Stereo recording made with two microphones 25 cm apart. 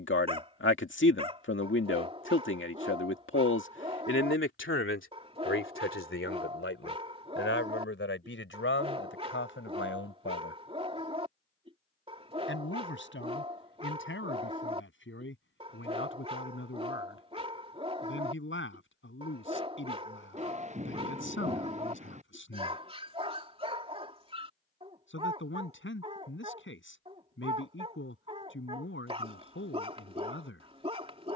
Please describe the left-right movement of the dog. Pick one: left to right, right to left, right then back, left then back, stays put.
stays put.